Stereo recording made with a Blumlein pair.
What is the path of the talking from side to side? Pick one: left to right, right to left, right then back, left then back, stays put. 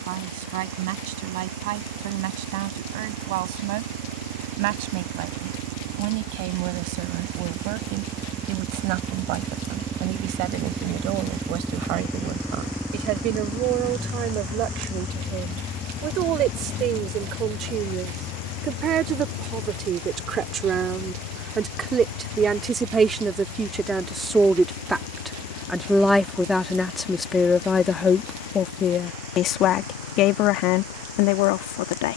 right to left.